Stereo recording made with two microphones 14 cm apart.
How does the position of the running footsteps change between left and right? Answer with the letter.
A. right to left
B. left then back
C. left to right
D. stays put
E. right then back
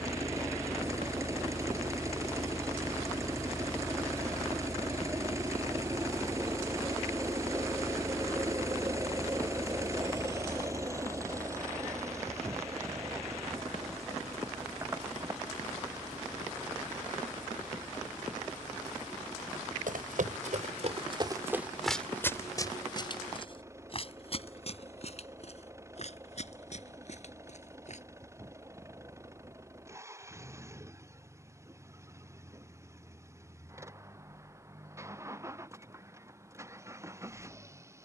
A.